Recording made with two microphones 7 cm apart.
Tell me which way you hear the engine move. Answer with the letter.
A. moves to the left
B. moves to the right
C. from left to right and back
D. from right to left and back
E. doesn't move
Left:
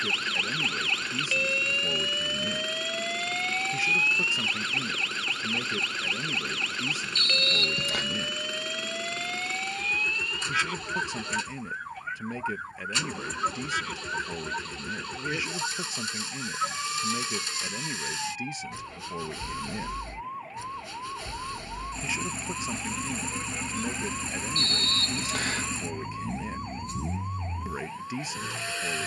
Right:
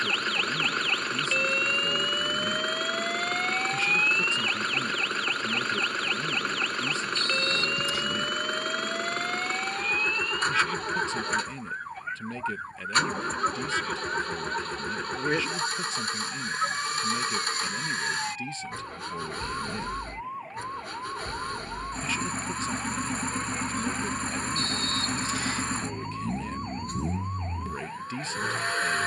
E.